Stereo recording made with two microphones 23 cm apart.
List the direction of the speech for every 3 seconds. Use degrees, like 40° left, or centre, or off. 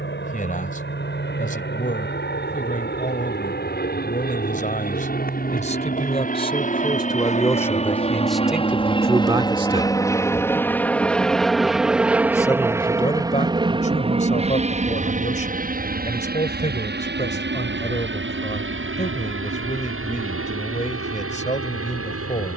30° left, 30° left, 10° left, 20° right, 30° left, 30° left, 30° left, 30° left.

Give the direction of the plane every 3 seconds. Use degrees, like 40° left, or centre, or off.
50° left, 40° left, 30° left, 10° left, 20° right, 40° right, 60° right, 60° right.